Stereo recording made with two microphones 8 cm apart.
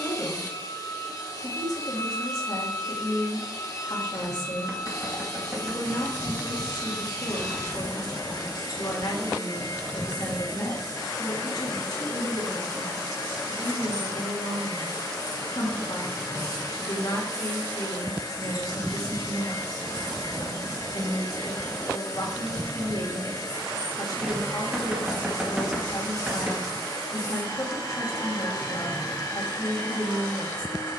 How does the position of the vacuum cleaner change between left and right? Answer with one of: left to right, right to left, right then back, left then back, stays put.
stays put.